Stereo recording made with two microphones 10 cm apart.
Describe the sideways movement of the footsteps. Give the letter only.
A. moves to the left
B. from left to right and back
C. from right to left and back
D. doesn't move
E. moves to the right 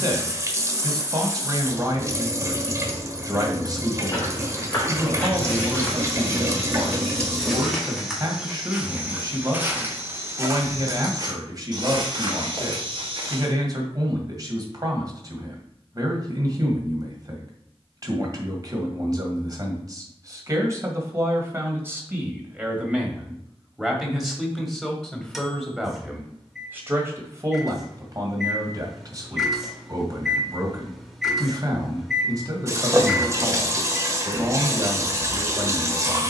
E.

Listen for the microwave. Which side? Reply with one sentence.
In this clip you hear the microwave in the centre.